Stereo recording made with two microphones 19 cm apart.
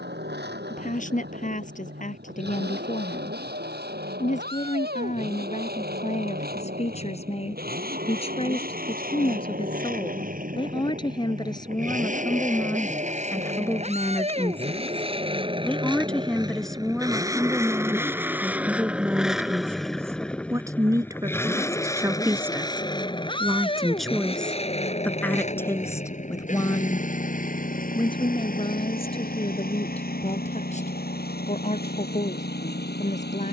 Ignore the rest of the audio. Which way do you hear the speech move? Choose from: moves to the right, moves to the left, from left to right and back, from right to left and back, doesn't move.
from left to right and back.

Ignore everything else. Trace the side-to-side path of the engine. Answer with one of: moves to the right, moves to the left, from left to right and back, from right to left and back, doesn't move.
moves to the left.